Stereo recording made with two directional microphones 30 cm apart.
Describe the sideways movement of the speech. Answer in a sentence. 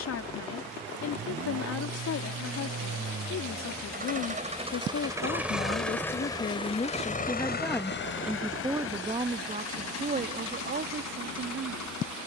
In this clip you hear the speech move to the right.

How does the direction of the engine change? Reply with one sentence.
In this clip you hear the engine move to the left.